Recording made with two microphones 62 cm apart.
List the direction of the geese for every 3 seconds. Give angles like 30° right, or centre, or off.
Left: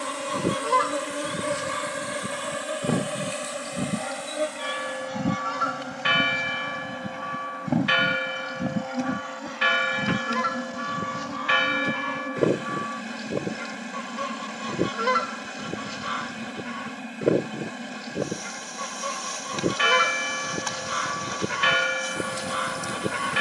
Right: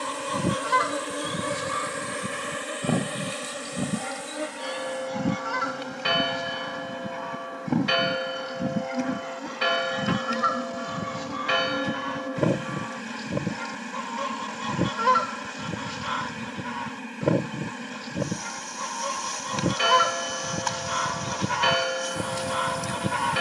10° right, centre, 10° left, 10° right, 20° right, 20° right, 20° right, 20° right.